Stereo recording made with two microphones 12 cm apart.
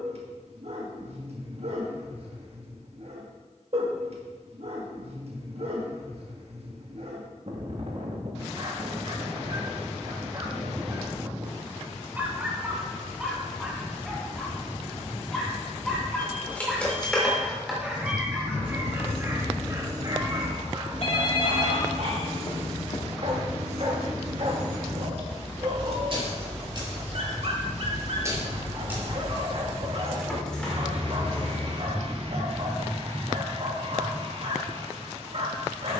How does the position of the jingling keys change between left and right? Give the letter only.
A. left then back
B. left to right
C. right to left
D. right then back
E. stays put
D.